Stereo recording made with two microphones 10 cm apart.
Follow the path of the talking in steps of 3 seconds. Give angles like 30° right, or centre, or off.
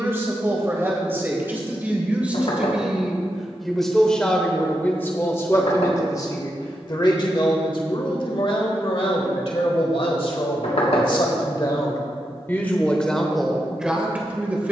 20° right, 10° left, 50° left, 50° left, centre.